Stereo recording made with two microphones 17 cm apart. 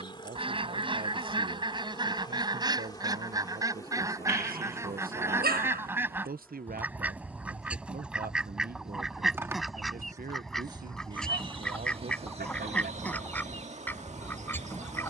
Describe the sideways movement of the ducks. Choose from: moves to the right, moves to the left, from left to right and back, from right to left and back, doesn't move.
moves to the left.